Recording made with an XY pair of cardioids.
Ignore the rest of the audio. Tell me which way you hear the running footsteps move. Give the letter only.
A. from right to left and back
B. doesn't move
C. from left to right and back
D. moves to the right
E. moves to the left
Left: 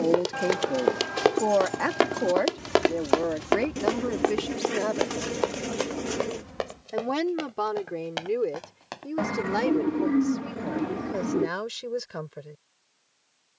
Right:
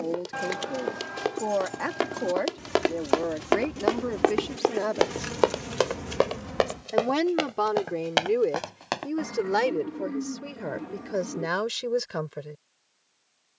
D.